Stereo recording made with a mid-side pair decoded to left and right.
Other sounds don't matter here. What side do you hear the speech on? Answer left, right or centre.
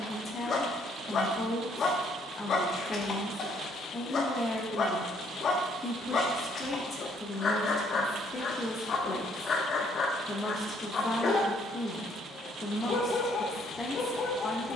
left.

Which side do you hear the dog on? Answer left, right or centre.
left.